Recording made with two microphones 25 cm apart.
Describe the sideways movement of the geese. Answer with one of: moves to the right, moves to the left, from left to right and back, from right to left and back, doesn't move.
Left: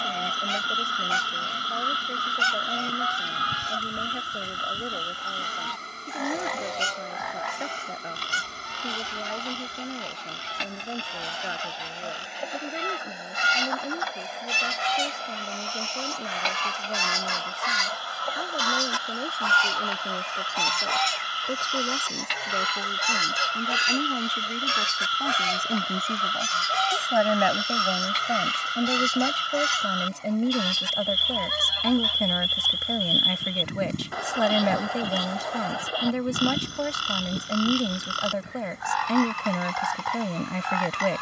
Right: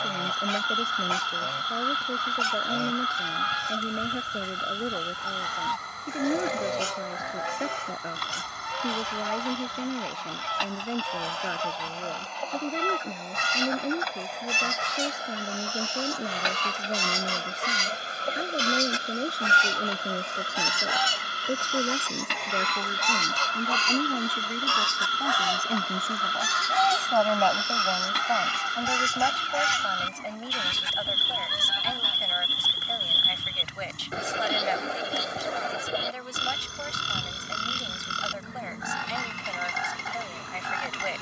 moves to the left.